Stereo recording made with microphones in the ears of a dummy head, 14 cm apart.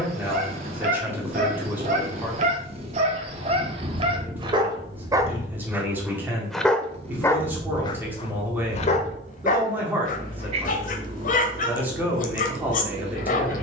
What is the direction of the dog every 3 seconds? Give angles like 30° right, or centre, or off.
50° right, 30° right, 20° left, 50° left, 50° left.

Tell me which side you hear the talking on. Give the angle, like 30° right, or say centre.
10° right.